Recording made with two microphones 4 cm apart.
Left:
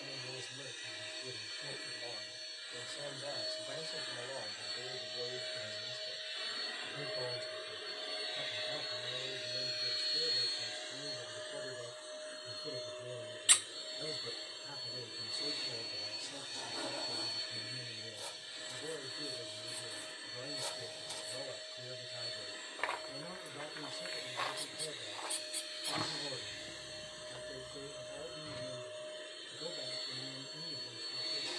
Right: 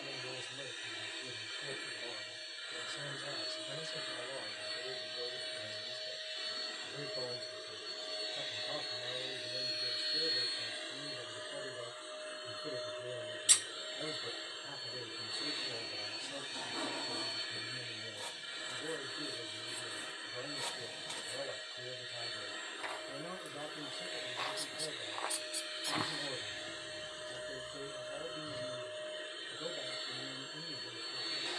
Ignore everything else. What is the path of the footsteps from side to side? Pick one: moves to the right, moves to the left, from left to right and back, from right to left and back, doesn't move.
from left to right and back.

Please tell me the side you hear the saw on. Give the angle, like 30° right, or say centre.
40° right.